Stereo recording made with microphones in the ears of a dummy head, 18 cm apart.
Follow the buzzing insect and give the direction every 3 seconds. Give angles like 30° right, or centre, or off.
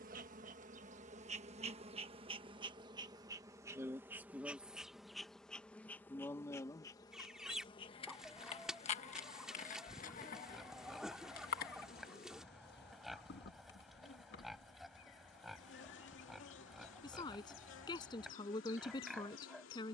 30° right, 10° right, 20° left, 40° left, 50° left, 60° left, 70° left.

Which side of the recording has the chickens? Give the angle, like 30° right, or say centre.
centre.